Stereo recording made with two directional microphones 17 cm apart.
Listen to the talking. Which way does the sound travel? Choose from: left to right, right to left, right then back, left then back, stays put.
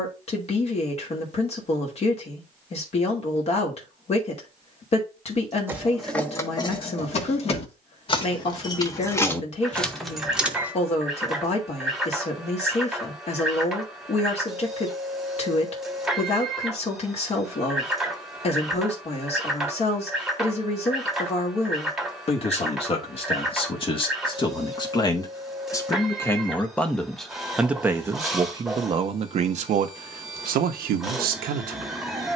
left to right.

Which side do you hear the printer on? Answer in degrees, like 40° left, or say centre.
centre.